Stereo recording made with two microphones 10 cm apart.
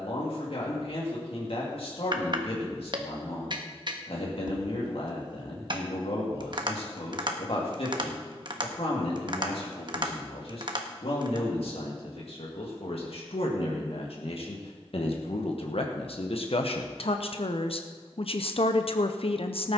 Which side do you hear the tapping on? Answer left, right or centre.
right.